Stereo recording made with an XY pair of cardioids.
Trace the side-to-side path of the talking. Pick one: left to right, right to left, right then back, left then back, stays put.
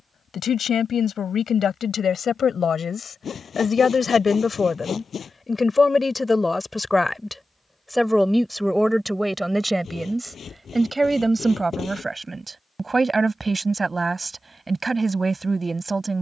left to right.